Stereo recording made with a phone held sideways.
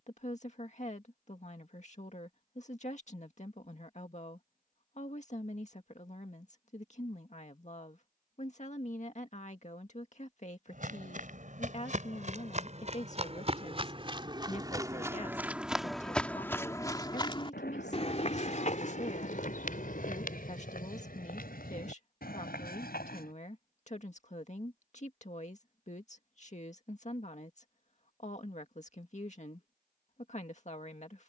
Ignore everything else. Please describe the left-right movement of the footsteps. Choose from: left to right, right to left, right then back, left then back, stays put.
right to left.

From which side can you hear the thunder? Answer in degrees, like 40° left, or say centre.
80° left.